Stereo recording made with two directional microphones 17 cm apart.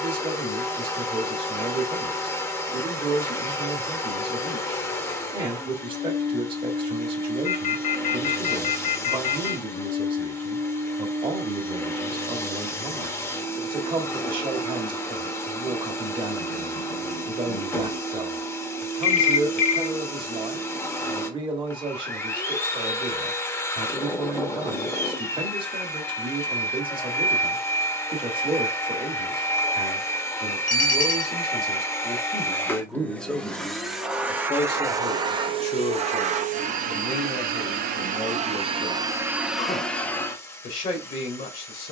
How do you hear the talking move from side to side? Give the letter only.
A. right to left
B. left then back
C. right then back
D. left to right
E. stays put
A.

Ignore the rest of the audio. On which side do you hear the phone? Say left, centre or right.
left.